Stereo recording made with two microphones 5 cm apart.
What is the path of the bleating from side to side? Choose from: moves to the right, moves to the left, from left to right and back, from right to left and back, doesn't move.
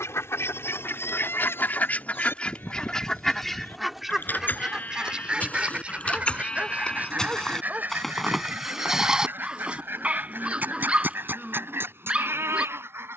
moves to the right.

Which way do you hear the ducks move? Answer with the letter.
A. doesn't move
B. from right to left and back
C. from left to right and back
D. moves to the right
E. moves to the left
D.